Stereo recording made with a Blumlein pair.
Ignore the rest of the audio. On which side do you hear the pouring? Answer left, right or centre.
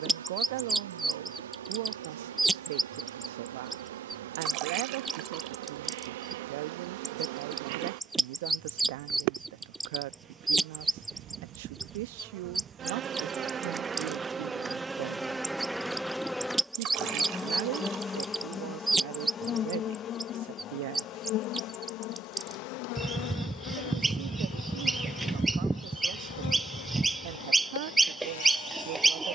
right.